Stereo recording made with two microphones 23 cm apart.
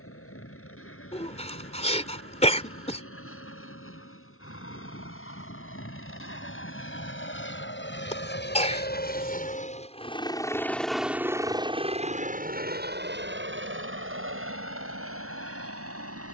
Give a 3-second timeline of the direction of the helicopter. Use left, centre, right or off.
left, left, left, centre, right, right.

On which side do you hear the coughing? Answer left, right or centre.
left.